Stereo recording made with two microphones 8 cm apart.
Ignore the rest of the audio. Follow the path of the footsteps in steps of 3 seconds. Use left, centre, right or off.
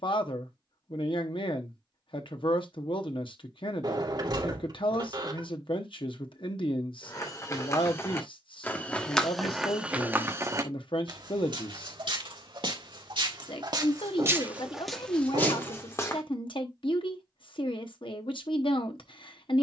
off, off, left, right, right, left, off.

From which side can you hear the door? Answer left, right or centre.
right.